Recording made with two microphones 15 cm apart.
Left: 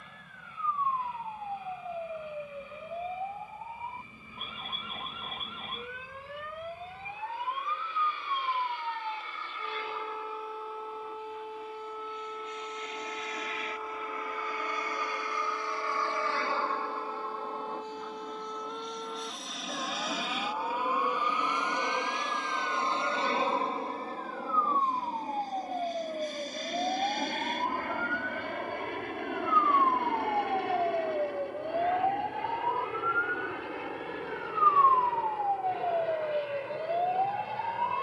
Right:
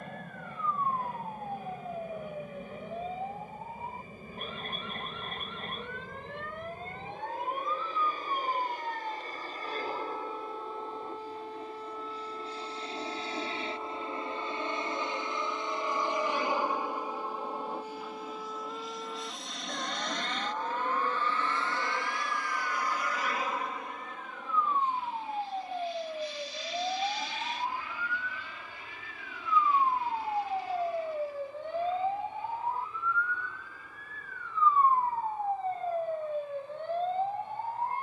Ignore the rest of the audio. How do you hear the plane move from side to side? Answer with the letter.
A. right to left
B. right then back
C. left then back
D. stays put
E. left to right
A.